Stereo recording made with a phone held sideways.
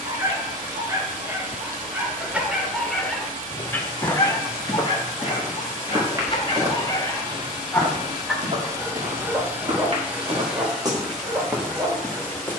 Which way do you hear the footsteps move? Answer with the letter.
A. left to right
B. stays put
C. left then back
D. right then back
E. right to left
D.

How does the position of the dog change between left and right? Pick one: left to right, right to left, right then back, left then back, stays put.
left then back.